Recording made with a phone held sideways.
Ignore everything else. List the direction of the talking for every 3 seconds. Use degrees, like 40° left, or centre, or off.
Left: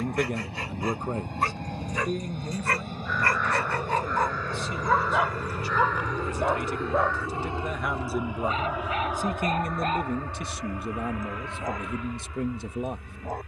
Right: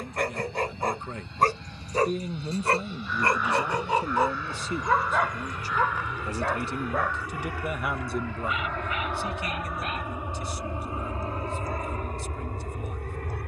20° left, 30° right, 10° right, 60° left, 70° left.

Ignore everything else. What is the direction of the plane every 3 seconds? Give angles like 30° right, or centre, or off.
60° left, 50° left, 20° left, 20° right, 50° right.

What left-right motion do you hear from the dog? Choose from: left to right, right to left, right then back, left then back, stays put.
right to left.